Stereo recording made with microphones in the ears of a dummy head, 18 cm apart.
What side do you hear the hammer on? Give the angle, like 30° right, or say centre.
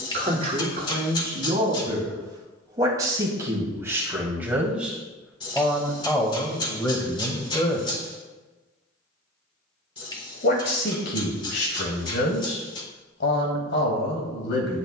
20° left.